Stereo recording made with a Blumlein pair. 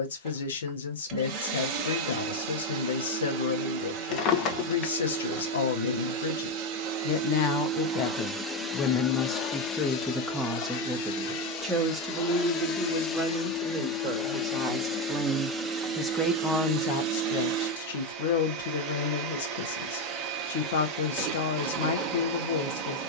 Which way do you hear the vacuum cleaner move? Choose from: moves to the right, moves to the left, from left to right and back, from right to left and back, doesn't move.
from right to left and back.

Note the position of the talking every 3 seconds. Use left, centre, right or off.
left, left, left, centre, right, left, left, left.